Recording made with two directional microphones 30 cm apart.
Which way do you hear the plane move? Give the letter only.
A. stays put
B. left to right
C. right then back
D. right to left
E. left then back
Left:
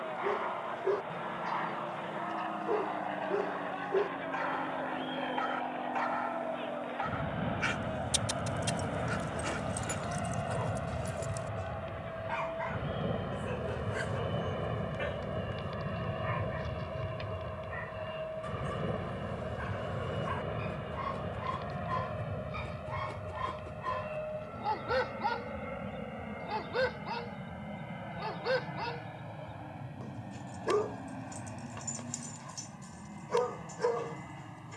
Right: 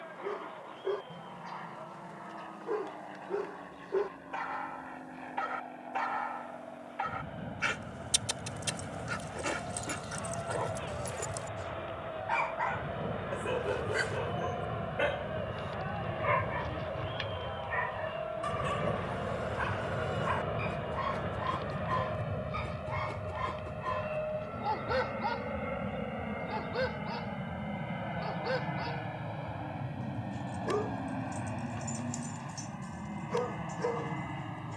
B.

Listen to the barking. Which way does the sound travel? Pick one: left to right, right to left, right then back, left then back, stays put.
right then back.